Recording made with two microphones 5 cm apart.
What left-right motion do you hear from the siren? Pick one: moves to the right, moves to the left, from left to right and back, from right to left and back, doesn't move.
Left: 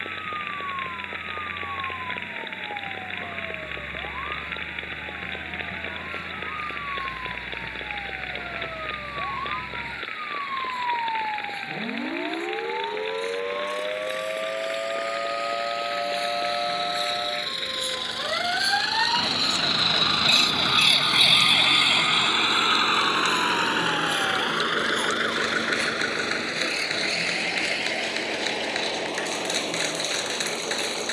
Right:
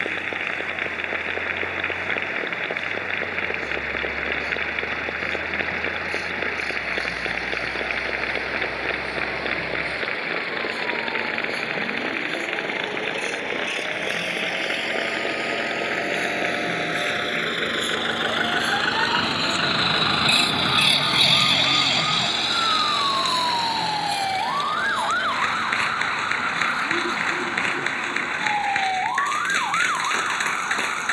moves to the right.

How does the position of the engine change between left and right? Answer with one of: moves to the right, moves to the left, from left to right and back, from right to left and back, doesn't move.
moves to the left.